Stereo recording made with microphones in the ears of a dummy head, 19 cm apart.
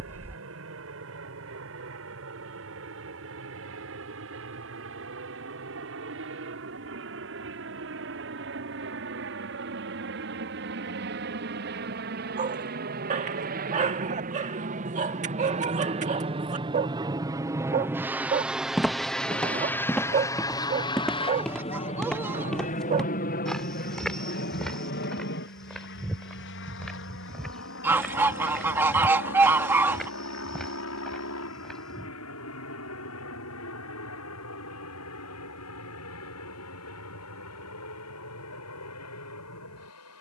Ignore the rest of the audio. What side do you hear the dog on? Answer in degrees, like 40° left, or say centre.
40° right.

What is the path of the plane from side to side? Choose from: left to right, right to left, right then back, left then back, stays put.
right to left.